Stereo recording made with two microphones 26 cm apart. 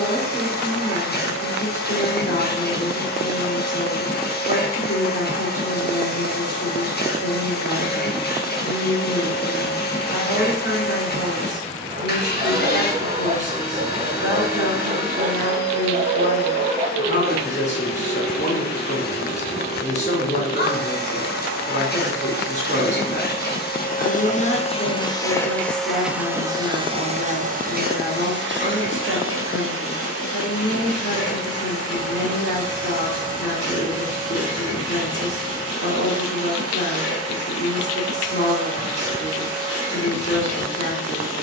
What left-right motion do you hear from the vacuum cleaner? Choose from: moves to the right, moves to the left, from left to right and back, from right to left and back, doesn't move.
moves to the right.